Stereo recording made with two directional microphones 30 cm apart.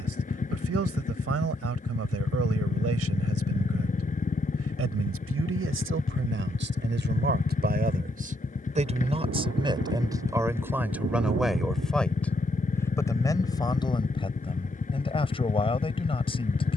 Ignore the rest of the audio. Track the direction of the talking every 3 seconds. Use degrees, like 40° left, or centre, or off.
60° right, 50° right, 40° right, 10° right, 10° left, 20° left.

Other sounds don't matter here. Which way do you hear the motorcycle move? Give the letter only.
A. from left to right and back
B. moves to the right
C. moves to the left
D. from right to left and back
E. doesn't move
E.